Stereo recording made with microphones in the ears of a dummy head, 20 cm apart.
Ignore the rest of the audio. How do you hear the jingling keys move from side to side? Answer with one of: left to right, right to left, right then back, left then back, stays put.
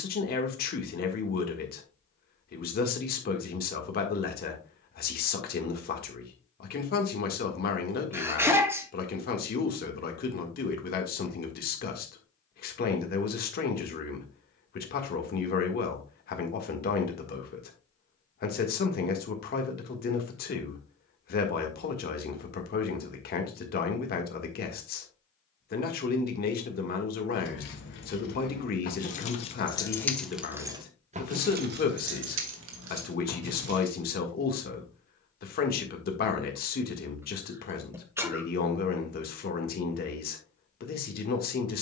left to right.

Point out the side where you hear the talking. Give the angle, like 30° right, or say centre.
40° left.